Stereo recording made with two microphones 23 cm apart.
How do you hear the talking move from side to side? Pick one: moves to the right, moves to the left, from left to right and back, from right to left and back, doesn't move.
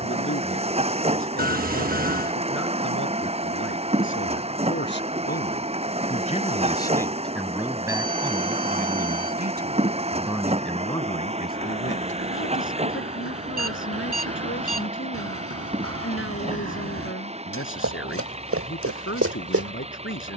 from left to right and back.